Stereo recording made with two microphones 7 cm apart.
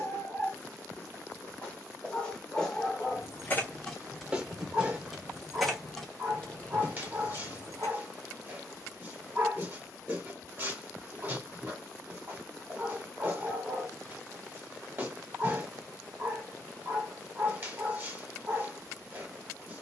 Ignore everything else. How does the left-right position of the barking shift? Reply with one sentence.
In this clip you hear the barking go from the left side to the right.